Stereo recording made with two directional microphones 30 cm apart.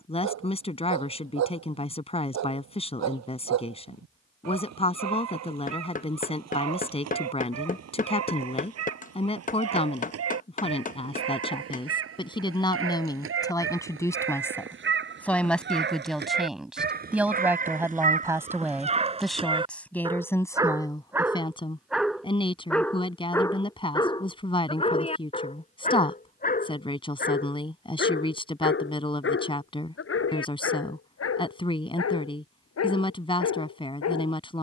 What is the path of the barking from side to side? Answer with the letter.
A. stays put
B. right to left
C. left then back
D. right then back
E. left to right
B.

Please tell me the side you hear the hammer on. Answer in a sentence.
In this clip you hear the hammer on the left.